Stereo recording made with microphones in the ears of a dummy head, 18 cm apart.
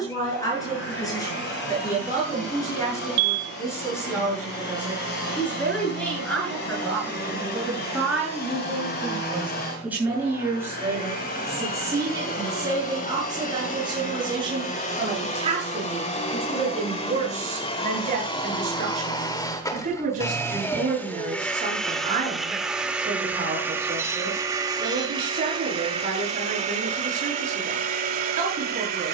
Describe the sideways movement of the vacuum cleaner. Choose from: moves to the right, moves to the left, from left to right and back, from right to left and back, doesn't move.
moves to the right.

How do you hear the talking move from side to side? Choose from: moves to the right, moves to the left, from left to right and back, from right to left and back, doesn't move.
moves to the right.